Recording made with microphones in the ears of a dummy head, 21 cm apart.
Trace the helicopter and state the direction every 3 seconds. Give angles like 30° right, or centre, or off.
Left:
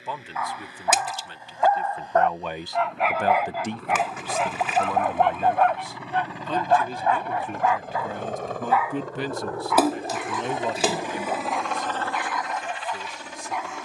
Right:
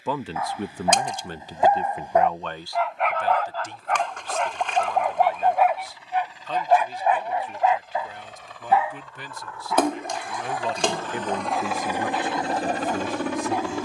60° left, 60° left, 50° left, 20° left, 40° right.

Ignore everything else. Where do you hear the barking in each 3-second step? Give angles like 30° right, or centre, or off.
20° right, centre, 20° right, 30° right, 30° right.